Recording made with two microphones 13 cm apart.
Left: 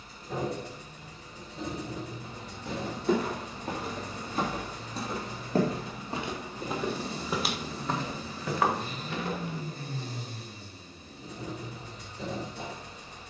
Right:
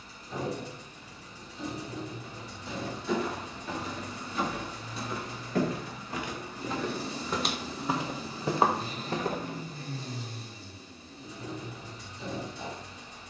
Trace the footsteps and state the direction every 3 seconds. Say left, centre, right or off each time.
left, left, centre, right, off.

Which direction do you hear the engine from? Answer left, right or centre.
left.